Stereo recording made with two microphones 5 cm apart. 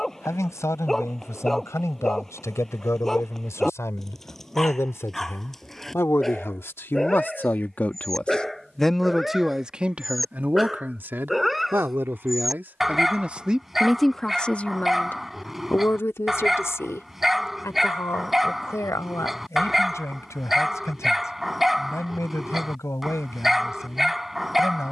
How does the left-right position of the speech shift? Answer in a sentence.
You can hear the speech move from left to right and back again.